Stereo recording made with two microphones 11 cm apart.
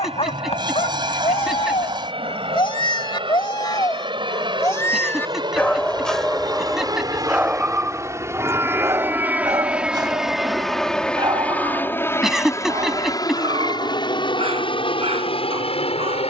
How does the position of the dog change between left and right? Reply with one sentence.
You can hear the dog move to the right.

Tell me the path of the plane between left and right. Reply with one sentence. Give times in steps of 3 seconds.
You can hear the plane on the right from 0 s, in the centre from 9 s and on the left from 12 s.